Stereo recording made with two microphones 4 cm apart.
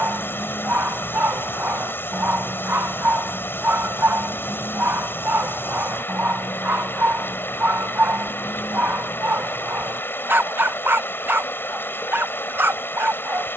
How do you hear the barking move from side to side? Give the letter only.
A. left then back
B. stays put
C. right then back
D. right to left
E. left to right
B.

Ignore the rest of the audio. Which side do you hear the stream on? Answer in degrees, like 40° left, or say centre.
60° left.